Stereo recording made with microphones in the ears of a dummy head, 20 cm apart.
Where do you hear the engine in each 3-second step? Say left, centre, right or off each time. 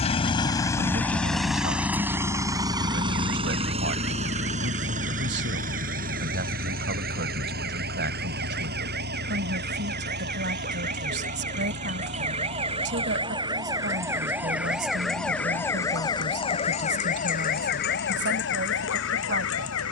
centre, right, right, right, right, right, right.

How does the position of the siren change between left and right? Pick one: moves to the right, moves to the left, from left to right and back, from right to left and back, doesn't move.
moves to the left.